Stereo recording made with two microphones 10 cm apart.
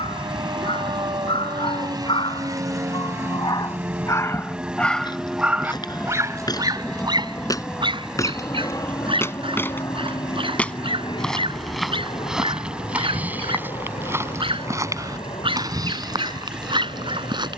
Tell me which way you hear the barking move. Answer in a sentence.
You can hear the barking move from left to right.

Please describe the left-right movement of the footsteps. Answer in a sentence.
In this clip you hear the footsteps go from the left side to the right.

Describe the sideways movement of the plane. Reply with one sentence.
In this clip you hear the plane travel towards the left.